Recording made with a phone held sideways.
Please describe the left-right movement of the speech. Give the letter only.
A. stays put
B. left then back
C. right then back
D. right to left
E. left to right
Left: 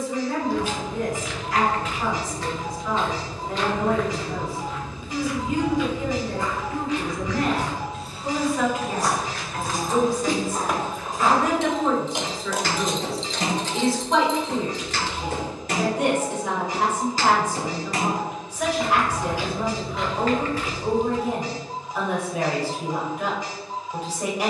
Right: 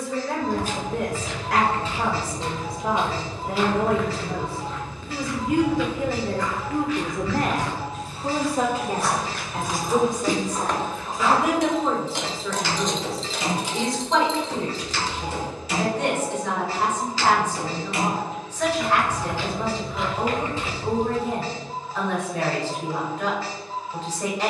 D.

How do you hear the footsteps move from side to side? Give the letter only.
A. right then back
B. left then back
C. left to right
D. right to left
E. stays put
B.